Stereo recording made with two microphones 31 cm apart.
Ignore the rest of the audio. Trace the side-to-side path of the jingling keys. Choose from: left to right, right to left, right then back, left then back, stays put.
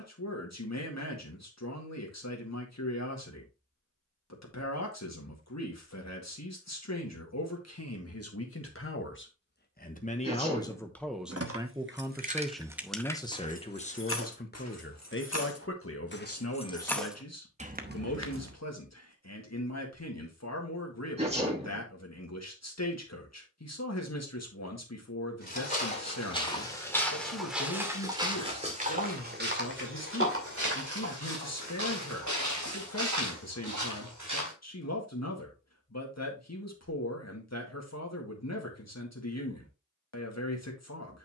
left then back.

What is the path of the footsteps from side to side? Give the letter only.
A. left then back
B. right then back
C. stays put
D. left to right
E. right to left
D.